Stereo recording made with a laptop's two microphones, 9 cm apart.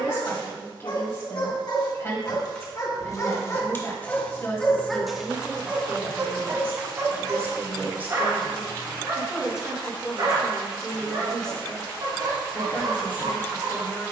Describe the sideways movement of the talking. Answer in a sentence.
You can hear the talking move from left to right and back again.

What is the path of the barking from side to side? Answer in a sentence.
You can hear the barking go from the left side to the right.